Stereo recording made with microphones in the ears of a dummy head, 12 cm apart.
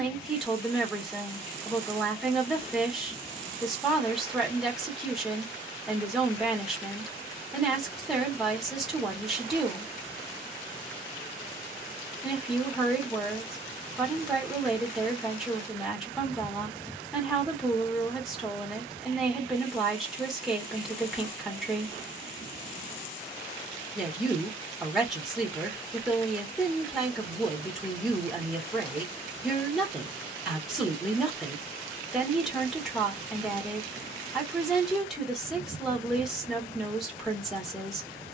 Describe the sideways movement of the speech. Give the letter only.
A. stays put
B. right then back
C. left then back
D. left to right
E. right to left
A.